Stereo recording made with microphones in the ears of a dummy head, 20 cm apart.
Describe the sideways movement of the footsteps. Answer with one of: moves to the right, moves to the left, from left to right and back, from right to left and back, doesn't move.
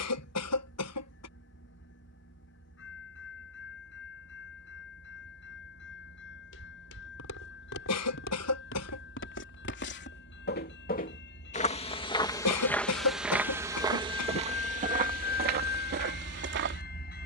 moves to the right.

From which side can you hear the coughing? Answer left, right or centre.
left.